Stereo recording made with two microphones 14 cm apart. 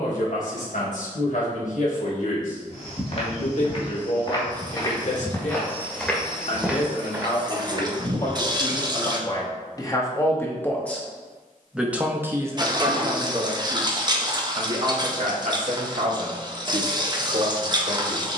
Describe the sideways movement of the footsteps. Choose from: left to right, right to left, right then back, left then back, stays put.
left to right.